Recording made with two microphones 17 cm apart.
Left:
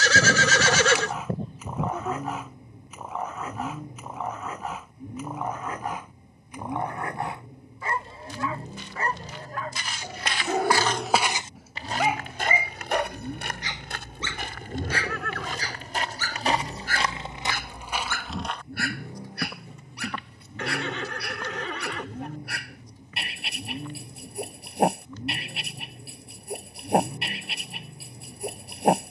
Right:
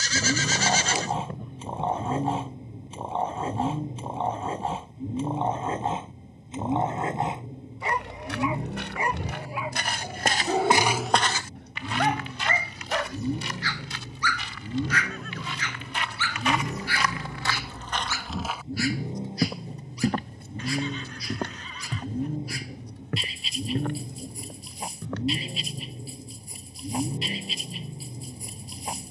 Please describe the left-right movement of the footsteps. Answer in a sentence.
In this clip you hear the footsteps move from right to left and back again.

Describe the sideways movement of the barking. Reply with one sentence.
You can hear the barking move from right to left.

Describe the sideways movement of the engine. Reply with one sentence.
You can hear the engine stay put.